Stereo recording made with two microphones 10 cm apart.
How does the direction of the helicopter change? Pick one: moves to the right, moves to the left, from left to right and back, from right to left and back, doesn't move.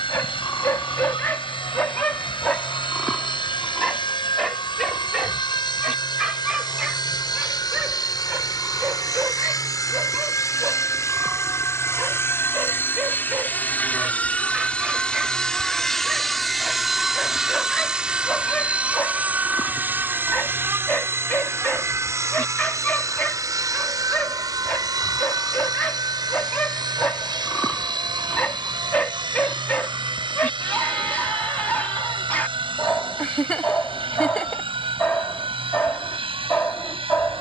moves to the right.